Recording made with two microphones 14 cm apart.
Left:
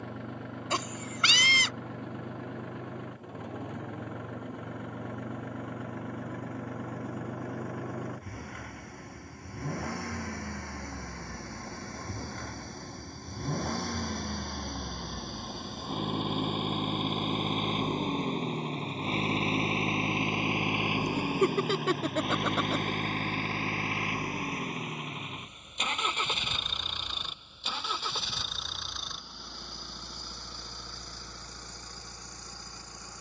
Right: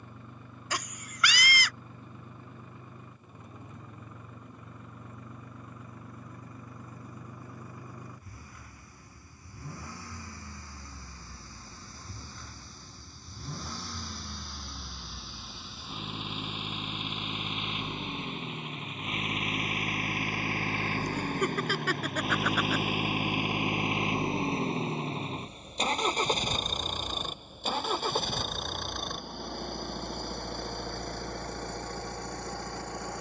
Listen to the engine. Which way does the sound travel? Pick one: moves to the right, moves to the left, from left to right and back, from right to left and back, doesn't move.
moves to the right.